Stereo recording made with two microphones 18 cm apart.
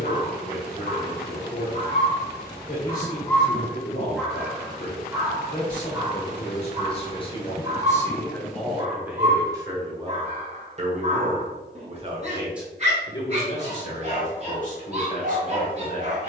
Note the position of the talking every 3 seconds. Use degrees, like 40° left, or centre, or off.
50° left, 50° left, 20° left, 30° right, 30° left, 50° left.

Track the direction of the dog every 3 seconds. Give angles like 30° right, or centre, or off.
50° left, centre, 40° right, 40° right, 40° right, 40° right.